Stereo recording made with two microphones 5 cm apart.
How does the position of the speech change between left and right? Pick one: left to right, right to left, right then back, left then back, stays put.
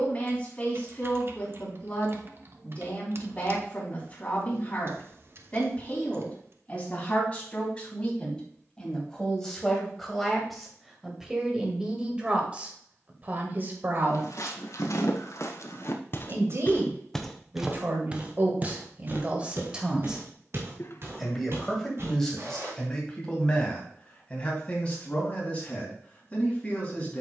right then back.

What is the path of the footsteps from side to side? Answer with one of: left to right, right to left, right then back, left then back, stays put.
left to right.